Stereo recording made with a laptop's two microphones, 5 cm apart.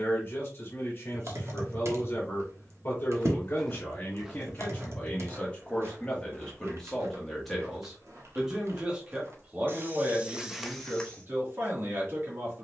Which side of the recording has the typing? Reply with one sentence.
You can hear the typing on the right.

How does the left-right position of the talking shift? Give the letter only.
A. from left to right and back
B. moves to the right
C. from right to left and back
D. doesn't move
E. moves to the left
B.